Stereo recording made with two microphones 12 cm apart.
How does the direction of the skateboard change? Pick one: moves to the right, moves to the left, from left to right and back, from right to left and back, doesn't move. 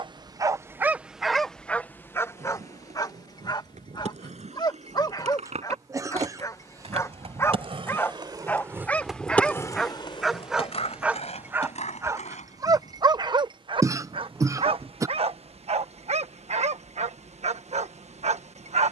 moves to the left.